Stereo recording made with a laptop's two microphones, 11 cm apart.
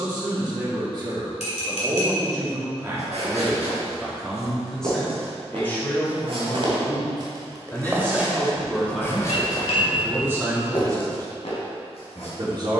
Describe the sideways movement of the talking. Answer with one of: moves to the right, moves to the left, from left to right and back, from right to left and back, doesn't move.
from right to left and back.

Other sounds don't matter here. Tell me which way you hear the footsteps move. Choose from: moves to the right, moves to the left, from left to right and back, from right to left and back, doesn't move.
moves to the left.